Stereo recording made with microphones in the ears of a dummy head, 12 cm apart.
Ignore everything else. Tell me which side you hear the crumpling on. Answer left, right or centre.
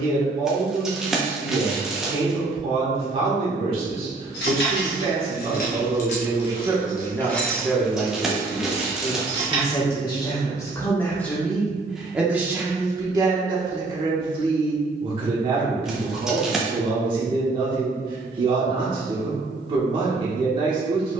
centre.